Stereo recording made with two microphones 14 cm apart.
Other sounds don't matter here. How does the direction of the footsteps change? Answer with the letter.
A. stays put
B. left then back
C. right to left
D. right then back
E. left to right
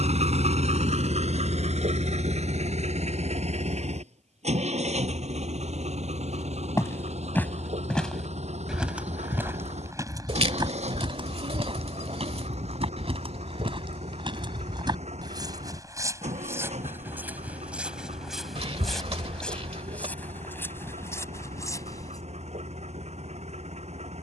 D.